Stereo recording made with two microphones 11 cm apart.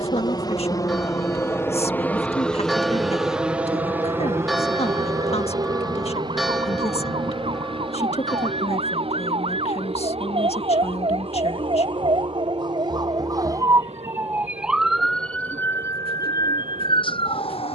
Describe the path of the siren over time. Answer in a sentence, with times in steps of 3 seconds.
In this clip you hear the siren on the right from 0 s and on the left from 15 s.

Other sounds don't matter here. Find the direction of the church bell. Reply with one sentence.
You can hear the church bell in the centre.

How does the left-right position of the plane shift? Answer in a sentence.
In this clip you hear the plane go from the left side to the right.